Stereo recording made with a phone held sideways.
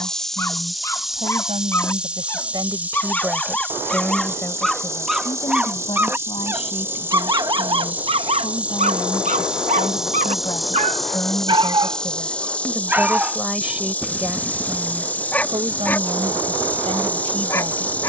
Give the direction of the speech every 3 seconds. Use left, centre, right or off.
right, centre, left, left, centre, right.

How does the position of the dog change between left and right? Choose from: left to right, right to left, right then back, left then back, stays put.
right then back.